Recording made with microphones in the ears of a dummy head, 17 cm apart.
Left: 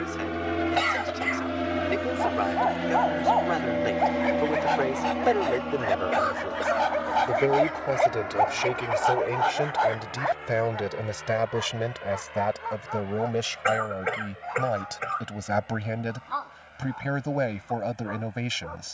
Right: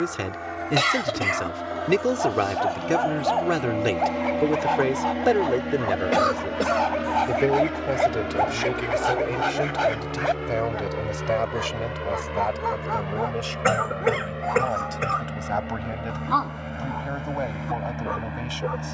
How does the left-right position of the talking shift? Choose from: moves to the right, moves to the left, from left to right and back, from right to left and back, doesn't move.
moves to the left.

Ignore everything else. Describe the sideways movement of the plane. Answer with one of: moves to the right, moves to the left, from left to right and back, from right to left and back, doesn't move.
moves to the right.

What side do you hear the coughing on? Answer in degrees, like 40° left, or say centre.
50° right.